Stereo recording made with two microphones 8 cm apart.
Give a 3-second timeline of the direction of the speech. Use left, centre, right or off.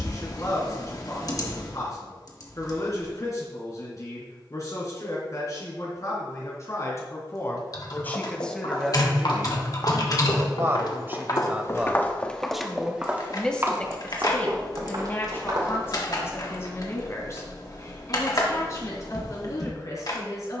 left, left, left, right, centre, left, left.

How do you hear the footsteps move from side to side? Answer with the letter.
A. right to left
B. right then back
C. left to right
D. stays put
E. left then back
C.